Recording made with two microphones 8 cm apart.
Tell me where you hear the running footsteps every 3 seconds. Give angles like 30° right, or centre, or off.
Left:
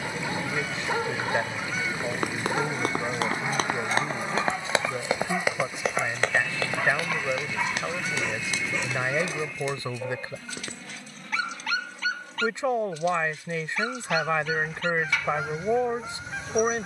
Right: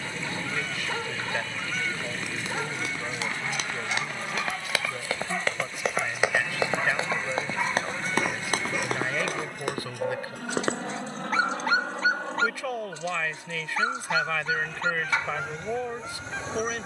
60° left, 30° left, 30° right, 60° right, off, off.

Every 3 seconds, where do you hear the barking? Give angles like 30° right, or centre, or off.
20° left, 10° left, centre, 30° right, 30° right, 30° right.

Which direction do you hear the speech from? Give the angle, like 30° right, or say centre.
30° left.